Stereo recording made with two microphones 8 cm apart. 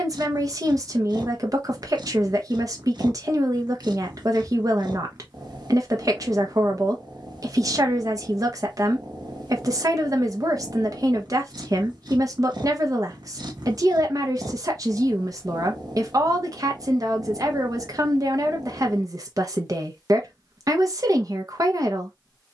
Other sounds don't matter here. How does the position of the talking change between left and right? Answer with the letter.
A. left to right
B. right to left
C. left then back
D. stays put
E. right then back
D.